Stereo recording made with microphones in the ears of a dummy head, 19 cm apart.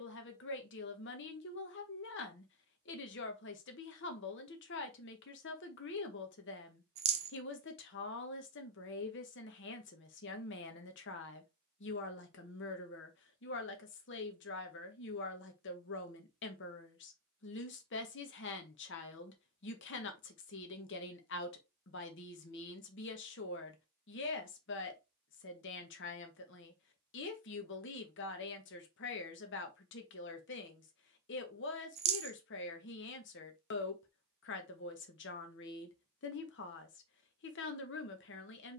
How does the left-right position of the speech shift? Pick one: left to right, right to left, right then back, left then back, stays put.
stays put.